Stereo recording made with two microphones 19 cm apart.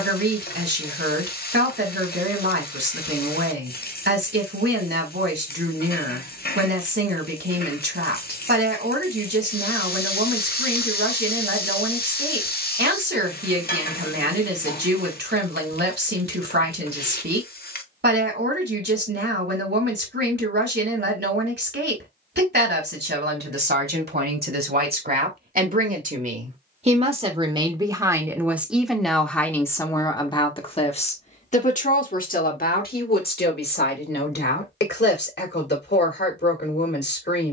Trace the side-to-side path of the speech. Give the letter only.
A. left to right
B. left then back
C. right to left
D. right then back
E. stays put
C.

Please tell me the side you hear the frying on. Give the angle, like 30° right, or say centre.
50° left.